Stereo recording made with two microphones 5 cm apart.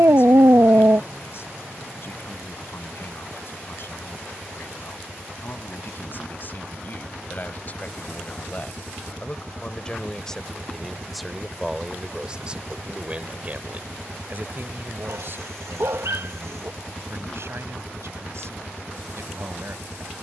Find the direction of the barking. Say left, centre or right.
right.